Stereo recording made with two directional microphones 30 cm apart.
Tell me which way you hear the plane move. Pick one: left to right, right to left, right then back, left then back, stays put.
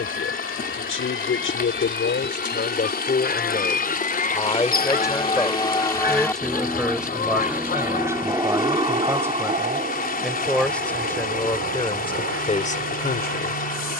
left to right.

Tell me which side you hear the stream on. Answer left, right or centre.
left.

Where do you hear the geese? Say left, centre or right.
left.